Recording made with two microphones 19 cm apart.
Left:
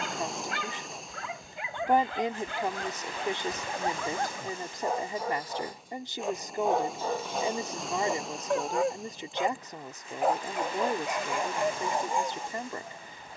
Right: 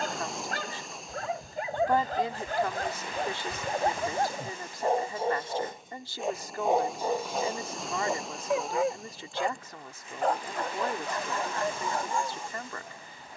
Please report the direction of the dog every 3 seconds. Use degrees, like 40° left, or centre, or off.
40° right, 30° right, 10° right, 10° left, 20° left.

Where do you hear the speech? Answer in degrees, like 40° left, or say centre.
20° left.